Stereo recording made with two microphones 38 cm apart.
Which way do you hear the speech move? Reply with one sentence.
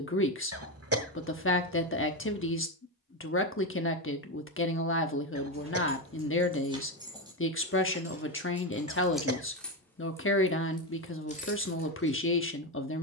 You can hear the speech stay put.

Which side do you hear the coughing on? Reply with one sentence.
You can hear the coughing on the right.